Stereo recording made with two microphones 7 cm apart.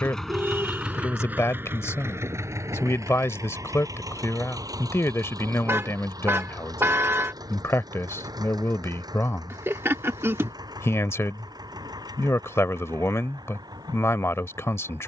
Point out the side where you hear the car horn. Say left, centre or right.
right.